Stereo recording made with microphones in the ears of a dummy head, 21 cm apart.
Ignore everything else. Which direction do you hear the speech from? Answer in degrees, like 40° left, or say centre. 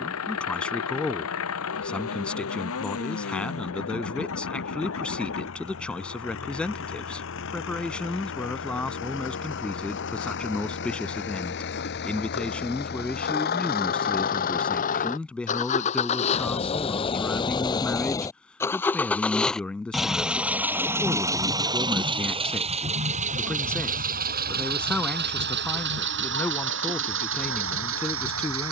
10° left.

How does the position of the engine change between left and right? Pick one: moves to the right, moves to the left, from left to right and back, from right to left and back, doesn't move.
moves to the right.